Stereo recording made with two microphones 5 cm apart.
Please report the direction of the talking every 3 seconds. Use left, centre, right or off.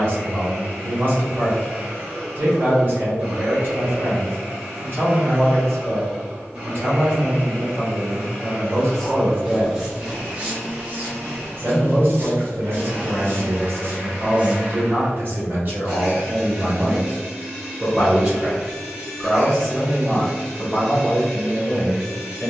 right, right, right, right, right, right, centre, left.